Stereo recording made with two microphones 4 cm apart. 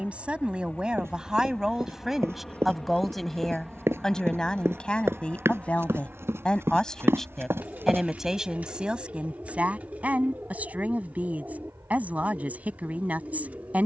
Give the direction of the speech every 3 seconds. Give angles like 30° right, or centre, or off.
10° right, 20° left, centre, 30° right, 30° right.